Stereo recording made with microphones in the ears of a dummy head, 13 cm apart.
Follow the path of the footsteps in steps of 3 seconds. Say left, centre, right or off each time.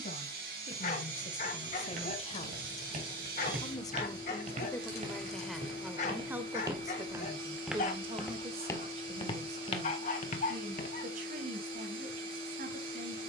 right, right, centre, left, off.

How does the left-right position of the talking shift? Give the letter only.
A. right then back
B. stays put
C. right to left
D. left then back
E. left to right
E.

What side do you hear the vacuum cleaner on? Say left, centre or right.
right.